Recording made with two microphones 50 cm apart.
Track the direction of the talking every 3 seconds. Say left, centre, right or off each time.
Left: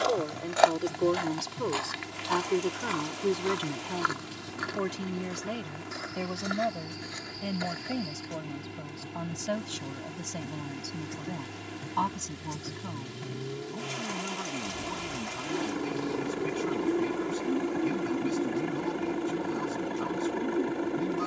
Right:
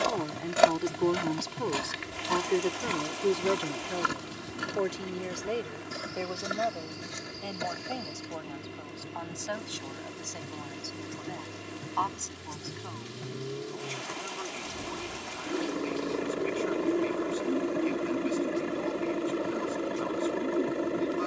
centre, left, left, left, left, left, left.